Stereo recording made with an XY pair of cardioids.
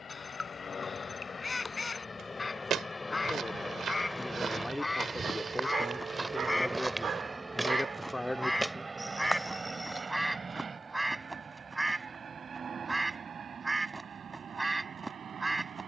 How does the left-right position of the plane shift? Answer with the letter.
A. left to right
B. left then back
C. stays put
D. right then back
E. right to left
A.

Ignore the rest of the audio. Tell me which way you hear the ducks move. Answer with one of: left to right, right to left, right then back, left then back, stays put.
left to right.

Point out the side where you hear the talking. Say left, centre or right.
centre.